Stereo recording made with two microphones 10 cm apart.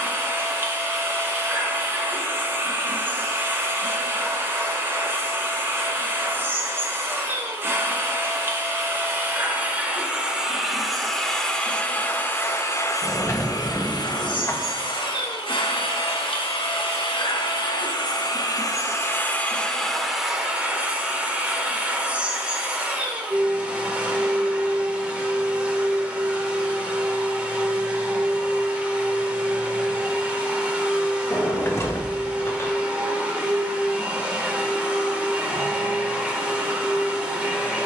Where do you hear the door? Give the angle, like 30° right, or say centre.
30° left.